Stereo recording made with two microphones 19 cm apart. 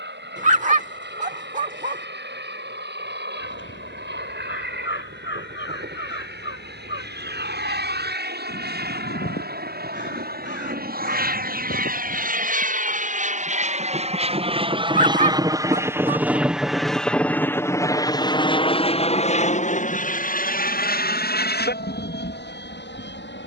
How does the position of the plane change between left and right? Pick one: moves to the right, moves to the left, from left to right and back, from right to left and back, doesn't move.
moves to the left.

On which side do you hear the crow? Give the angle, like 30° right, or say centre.
70° left.